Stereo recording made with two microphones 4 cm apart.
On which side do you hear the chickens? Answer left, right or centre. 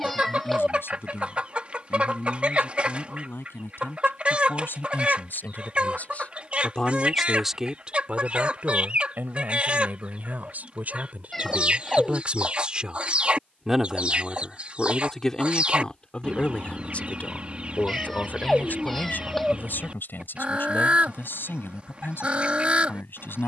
right.